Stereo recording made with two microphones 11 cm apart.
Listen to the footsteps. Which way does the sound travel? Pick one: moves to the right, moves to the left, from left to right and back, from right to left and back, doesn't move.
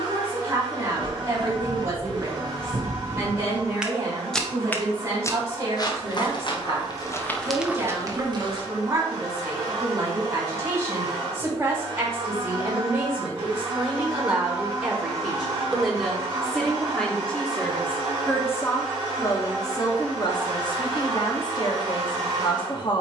from right to left and back.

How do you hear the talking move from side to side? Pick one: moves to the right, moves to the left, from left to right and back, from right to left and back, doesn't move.
moves to the left.